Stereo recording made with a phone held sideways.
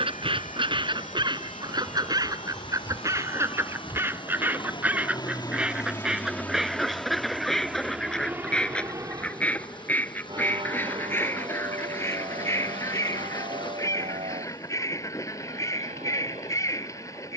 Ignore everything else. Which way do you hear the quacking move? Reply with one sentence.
In this clip you hear the quacking travel towards the left.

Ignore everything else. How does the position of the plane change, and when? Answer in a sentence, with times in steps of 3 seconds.
You can hear the plane on the left from 0 s, in the centre from 6 s and on the right from 9 s.